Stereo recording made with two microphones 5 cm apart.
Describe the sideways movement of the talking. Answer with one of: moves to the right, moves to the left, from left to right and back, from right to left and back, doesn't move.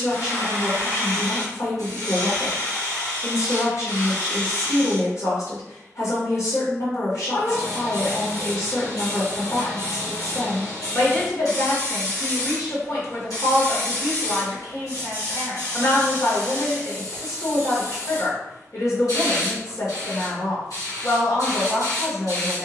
doesn't move.